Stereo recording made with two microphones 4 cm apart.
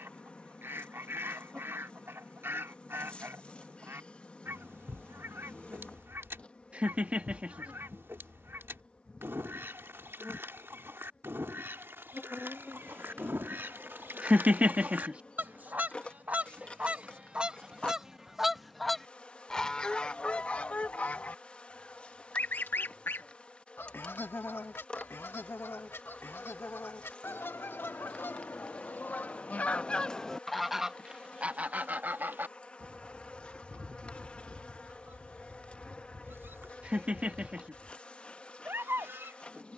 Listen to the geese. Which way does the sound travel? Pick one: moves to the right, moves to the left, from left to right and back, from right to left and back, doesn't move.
from right to left and back.